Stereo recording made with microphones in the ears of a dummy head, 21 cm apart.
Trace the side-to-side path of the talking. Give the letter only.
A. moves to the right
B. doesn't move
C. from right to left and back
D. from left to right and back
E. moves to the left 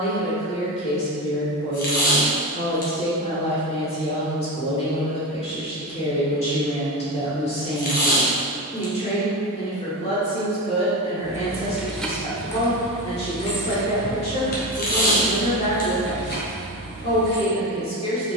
B.